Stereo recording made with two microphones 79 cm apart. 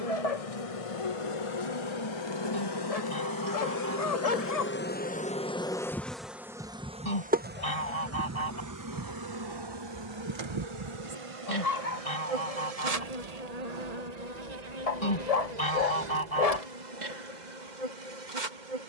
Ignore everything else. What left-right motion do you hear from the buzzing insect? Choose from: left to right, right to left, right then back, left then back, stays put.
left to right.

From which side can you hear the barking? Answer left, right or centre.
left.